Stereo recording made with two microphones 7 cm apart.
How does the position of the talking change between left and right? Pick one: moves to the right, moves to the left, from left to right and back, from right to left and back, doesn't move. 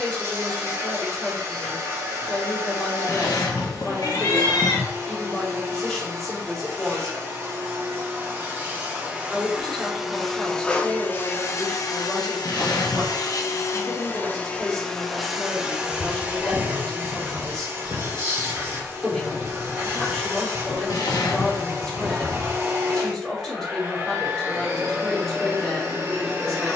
doesn't move.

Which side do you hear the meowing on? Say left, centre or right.
left.